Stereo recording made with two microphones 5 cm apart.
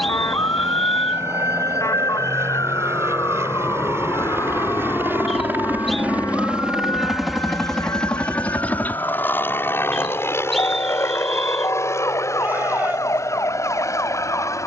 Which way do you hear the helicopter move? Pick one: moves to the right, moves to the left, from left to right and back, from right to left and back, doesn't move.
moves to the left.